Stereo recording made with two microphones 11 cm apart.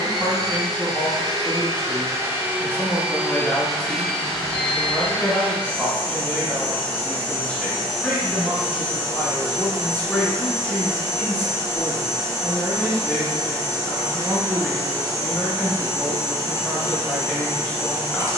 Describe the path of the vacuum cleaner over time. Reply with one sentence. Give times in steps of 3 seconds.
You can hear the vacuum cleaner on the right from 0 s, in the centre from 3 s and on the right from 9 s.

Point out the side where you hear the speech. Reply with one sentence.
In this clip you hear the speech in the centre.